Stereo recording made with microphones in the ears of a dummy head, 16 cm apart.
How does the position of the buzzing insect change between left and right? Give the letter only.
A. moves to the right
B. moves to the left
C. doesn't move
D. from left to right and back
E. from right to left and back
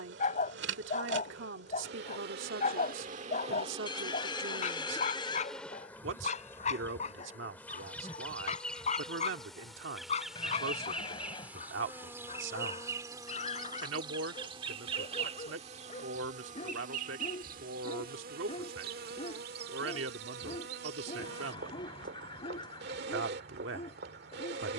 E.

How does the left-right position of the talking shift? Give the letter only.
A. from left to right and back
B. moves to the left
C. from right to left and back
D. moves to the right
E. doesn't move
E.